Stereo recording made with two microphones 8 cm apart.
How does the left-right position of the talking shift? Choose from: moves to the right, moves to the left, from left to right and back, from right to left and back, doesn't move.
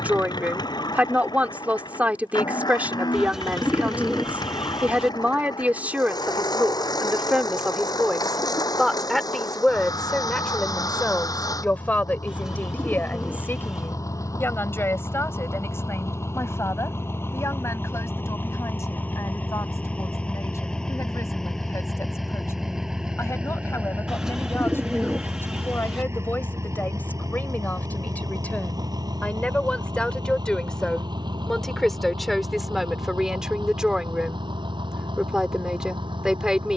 from right to left and back.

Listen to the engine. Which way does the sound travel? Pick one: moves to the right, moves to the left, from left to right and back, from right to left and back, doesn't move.
moves to the right.